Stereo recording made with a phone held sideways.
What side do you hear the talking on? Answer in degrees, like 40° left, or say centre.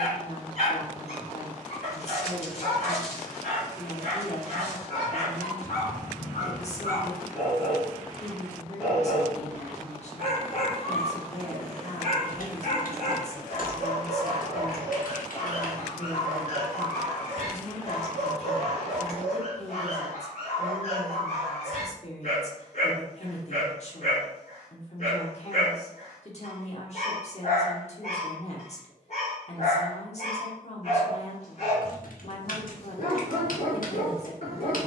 50° left.